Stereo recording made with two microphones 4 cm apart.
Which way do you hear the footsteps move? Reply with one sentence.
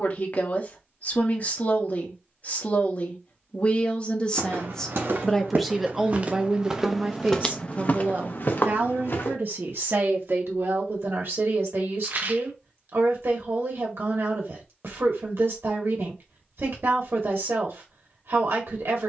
In this clip you hear the footsteps move from right to left.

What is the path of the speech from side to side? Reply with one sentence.
In this clip you hear the speech go from the left side to the right.